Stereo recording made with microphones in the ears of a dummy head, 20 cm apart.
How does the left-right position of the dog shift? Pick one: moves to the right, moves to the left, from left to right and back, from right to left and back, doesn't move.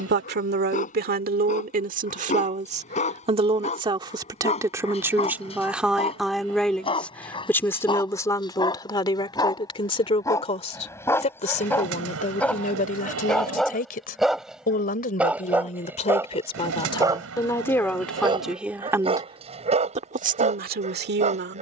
moves to the right.